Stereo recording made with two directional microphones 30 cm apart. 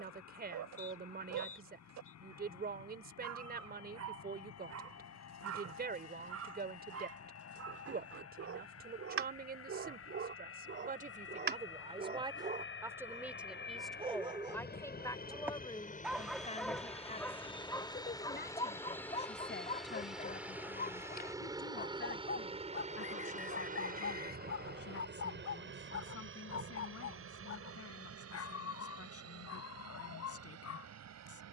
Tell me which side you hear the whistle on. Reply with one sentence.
You can hear the whistle on the left.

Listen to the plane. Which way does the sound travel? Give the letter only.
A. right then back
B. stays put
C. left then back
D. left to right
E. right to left
D.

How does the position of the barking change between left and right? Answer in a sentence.
In this clip you hear the barking move from right to left.